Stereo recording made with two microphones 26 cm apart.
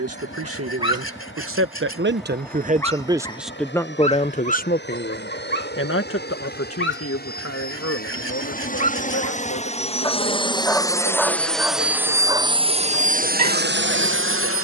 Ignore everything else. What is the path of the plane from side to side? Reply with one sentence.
In this clip you hear the plane move to the right.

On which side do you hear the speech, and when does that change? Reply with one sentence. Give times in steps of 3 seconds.
In this clip you hear the speech on the right from 0 s and on the left from 3 s.